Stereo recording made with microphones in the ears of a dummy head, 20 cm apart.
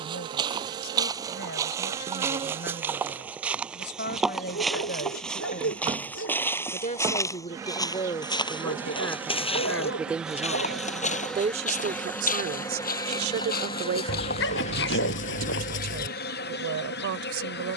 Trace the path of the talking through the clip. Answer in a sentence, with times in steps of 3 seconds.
In this clip you hear the talking on the left from 0 s, in the centre from 9 s and on the right from 12 s.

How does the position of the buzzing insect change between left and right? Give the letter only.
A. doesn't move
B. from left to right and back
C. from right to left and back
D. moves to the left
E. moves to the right
D.